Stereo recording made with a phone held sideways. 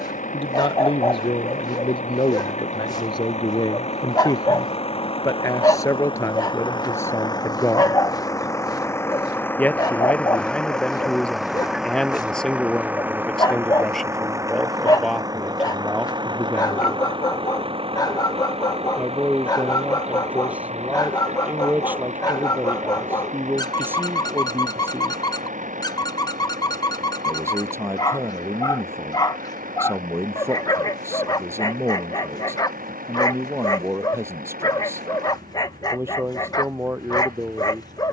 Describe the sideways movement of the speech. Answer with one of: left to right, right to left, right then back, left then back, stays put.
left to right.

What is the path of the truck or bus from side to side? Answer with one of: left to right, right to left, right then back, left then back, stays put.
left to right.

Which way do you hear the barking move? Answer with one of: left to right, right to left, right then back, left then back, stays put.
stays put.